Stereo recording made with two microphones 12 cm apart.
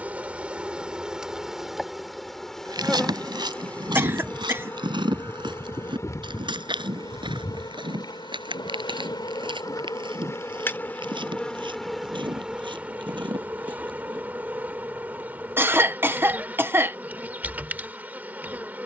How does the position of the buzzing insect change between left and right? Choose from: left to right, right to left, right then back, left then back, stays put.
left then back.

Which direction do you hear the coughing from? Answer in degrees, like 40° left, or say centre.
20° right.